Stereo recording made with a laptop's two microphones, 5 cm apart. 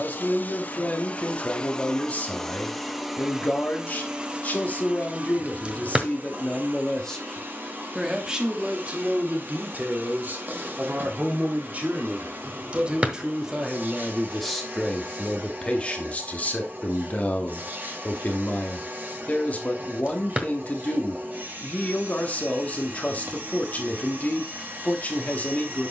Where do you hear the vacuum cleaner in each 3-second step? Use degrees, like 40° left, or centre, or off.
20° left, 20° right, 40° right, 40° right, 40° right, 40° right, 40° right, 40° right, 40° right.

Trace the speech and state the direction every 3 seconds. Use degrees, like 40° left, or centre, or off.
30° left, 30° left, centre, 40° right, 10° right, 20° left, 30° left, 30° left, 30° left.